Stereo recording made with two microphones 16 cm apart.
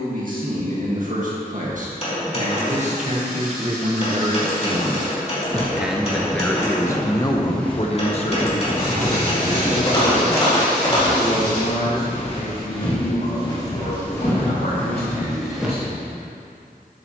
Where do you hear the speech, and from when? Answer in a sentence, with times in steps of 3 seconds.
You can hear the speech on the right from 0 s and on the left from 6 s.